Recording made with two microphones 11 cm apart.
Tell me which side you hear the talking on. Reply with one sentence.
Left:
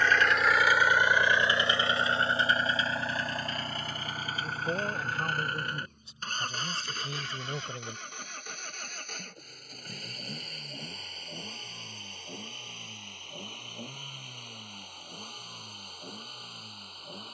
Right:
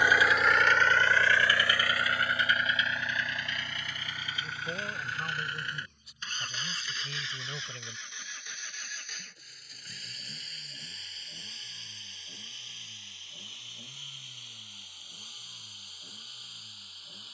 In this clip you hear the talking on the left.